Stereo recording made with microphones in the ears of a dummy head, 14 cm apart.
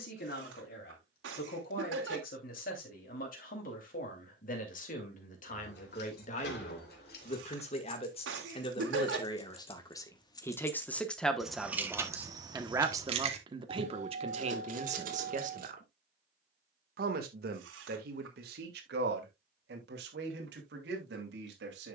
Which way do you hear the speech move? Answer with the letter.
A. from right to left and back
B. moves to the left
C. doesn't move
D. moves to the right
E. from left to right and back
D.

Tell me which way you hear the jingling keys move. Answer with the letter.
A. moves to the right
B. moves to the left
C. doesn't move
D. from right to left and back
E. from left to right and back
A.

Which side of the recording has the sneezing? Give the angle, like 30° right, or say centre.
90° right.